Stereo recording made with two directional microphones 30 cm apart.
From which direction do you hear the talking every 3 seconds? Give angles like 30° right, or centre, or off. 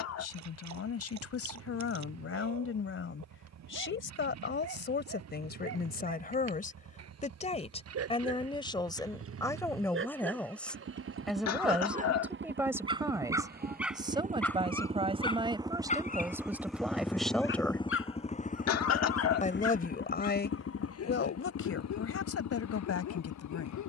50° left, 40° left, 20° left, centre, 10° right, 10° right, 30° left, 50° left.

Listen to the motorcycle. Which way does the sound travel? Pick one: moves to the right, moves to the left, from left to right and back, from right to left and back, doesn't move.
moves to the left.